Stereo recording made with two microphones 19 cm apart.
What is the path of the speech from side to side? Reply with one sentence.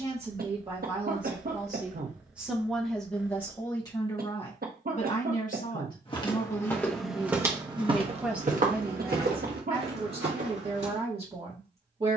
You can hear the speech go left and come back.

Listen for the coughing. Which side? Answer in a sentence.
In this clip you hear the coughing on the right.